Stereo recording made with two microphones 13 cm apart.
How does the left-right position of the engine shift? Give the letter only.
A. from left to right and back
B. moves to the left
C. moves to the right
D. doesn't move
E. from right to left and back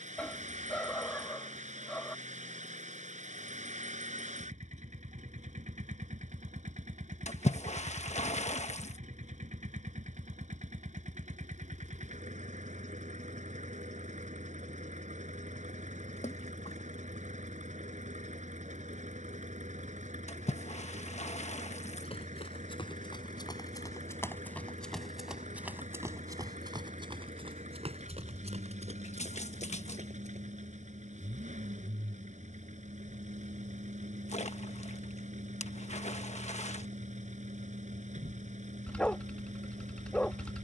D.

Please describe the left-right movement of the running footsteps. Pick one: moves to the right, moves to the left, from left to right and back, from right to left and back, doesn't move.
moves to the right.